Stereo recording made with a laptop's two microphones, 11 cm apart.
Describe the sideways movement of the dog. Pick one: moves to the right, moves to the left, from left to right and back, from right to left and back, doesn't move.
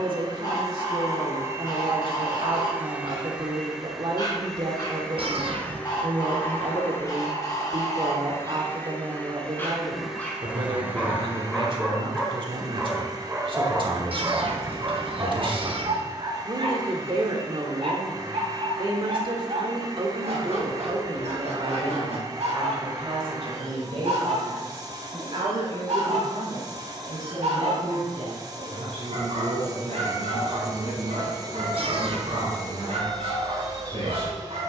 moves to the right.